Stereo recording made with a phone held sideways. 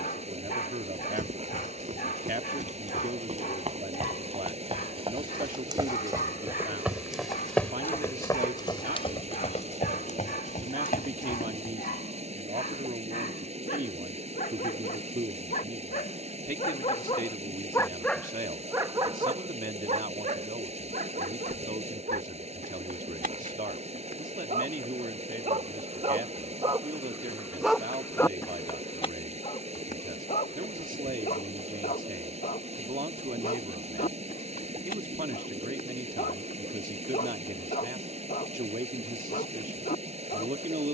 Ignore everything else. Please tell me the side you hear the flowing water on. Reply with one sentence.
In this clip you hear the flowing water on the right.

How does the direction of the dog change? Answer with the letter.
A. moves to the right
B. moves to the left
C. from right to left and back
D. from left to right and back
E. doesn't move
D.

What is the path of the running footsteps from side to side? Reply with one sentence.
You can hear the running footsteps move from right to left.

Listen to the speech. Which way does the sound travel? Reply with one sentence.
In this clip you hear the speech stay in one place.